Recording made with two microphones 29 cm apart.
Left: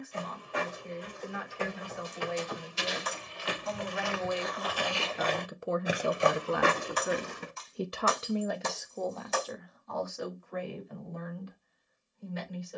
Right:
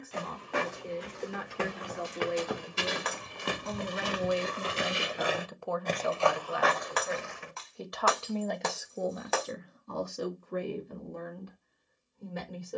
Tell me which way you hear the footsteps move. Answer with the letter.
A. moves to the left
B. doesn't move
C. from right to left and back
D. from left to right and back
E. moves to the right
A.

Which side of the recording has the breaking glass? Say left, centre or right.
right.